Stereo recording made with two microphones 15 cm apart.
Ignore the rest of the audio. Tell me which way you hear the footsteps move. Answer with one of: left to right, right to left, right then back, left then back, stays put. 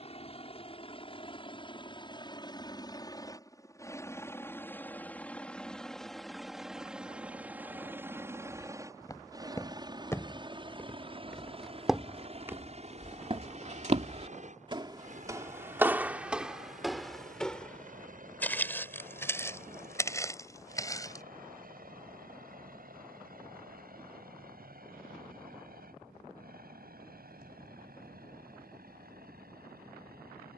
right then back.